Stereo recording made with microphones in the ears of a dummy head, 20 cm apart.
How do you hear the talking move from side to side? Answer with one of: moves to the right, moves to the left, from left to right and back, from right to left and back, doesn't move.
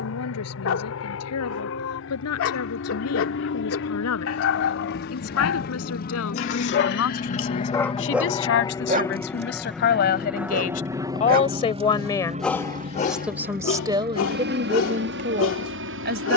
moves to the right.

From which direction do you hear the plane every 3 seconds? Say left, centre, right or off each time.
left, left, left, centre, right, right.